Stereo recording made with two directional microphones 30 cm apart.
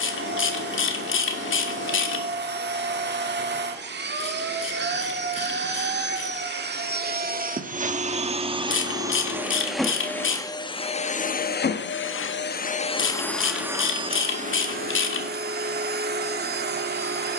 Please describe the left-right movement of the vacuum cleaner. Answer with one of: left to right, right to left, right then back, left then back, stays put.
left then back.